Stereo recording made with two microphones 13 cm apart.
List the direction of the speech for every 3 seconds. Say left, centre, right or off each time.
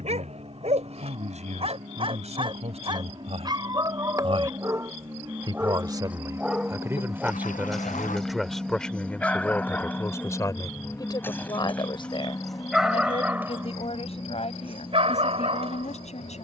right, right, centre, left, left, left.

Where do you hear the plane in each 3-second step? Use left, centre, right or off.
right, right, centre, centre, left, left.